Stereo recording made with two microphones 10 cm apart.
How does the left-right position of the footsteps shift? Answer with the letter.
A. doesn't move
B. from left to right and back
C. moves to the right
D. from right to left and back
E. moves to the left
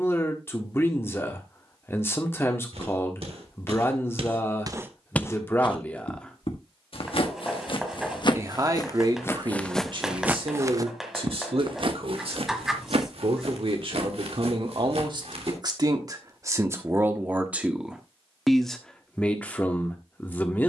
D.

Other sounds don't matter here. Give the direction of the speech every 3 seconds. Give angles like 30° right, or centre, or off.
20° left, 20° left, 20° right, 60° right, 60° right, 30° right, 10° left.